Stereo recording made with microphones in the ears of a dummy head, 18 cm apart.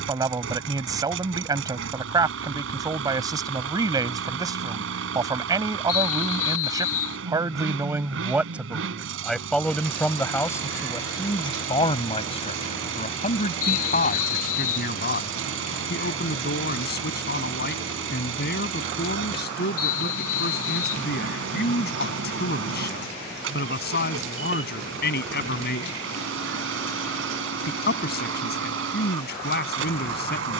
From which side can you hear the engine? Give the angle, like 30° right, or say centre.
70° right.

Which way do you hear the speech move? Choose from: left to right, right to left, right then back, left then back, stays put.
right to left.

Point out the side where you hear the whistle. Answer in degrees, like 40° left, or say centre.
80° left.